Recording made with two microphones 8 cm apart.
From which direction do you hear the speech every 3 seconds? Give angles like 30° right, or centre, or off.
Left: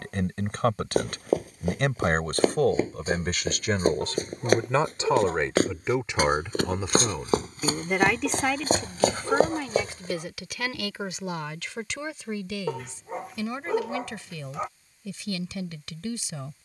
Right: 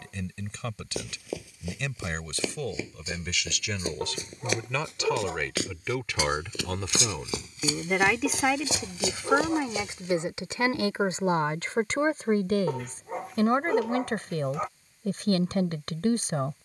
50° left, 40° left, 10° left, 30° right, 50° right, 50° right.